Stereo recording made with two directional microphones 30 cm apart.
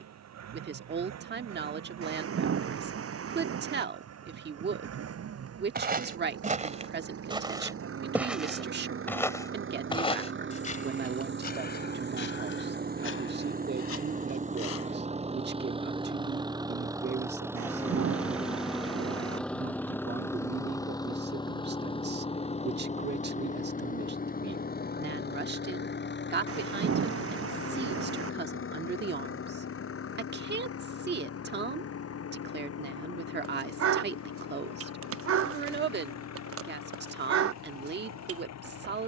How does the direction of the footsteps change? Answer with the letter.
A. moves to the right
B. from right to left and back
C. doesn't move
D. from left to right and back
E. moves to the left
E.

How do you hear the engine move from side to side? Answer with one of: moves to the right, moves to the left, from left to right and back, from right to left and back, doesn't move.
moves to the left.